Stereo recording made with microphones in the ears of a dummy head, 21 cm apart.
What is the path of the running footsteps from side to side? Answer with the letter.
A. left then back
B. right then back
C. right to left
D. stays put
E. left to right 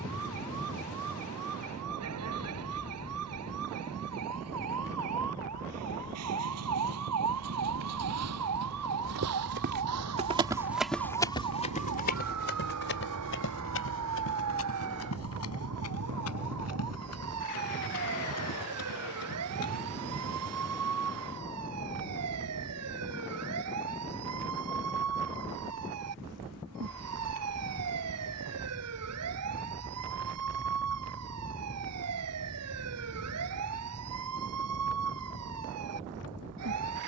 C.